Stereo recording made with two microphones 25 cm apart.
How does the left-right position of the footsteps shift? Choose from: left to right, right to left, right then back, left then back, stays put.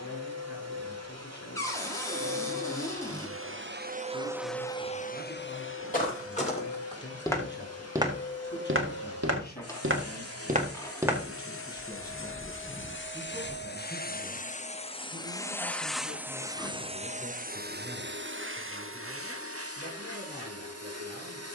right then back.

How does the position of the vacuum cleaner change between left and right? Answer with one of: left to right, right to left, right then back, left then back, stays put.
left then back.